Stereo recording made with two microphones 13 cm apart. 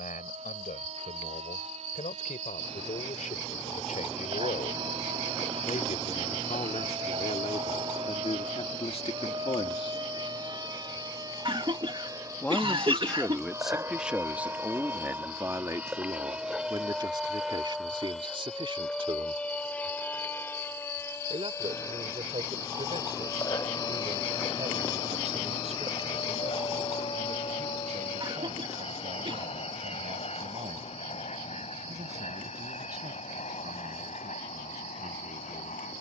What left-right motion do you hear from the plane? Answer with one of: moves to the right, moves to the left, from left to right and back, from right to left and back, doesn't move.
moves to the left.